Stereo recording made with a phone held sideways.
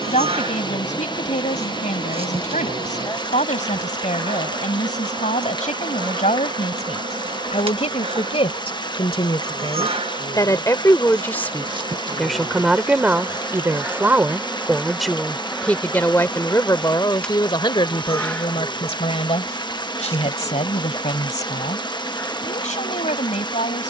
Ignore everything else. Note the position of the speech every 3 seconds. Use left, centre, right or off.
left, left, left, left, centre, left, left, left.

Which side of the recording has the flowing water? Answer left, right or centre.
left.